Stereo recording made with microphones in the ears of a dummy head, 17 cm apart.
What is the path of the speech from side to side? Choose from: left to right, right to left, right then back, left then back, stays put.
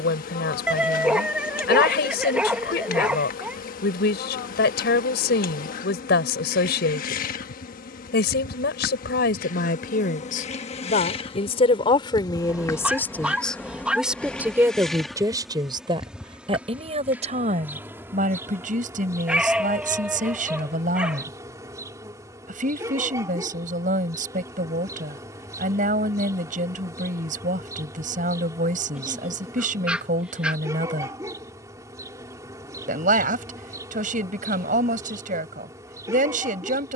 left to right.